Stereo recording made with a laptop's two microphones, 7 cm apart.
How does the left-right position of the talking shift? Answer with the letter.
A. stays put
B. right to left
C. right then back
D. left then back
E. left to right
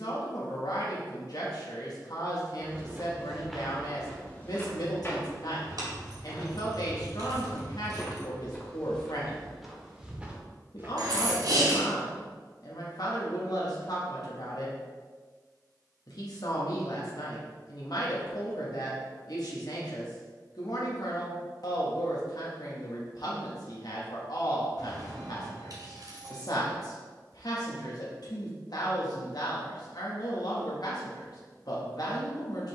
A.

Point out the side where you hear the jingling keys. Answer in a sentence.
In this clip you hear the jingling keys on the right.